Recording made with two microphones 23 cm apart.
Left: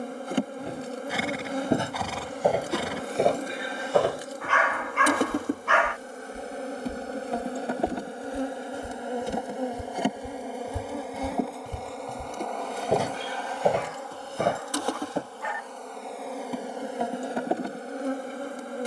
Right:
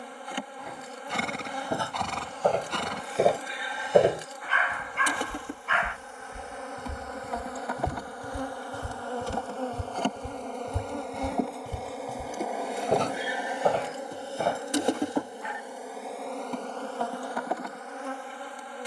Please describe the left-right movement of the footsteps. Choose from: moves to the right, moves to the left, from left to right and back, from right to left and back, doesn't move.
from left to right and back.